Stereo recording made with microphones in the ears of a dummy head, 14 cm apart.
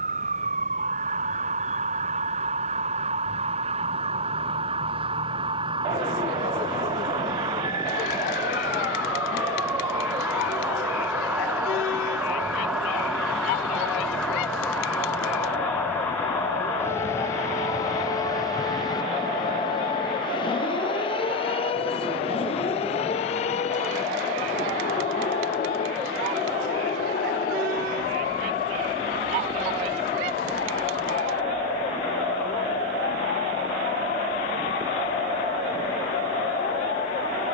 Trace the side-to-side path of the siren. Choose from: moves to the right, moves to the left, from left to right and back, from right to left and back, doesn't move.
moves to the left.